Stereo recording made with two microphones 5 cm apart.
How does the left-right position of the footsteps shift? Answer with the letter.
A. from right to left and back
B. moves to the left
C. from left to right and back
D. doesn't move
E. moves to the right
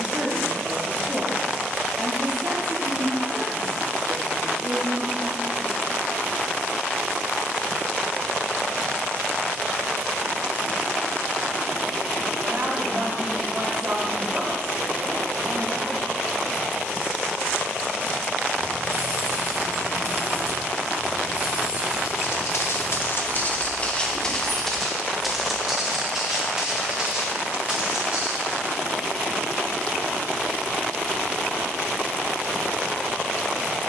E.